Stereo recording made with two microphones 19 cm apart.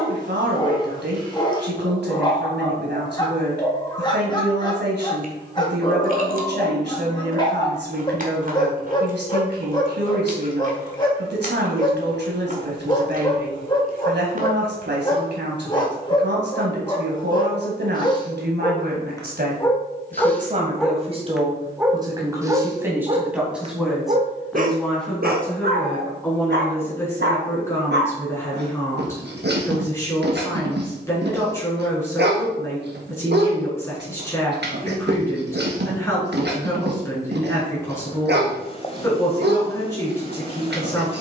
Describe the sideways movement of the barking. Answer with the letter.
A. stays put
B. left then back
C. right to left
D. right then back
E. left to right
E.